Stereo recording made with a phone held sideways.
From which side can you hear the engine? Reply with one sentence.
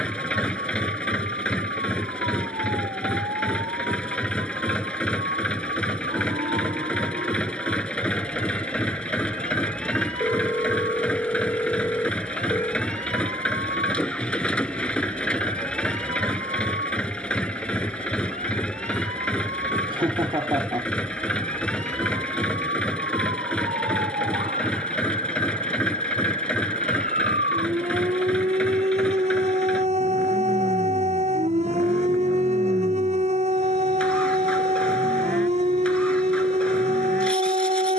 You can hear the engine in the centre.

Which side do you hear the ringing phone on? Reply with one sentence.
In this clip you hear the ringing phone in the centre.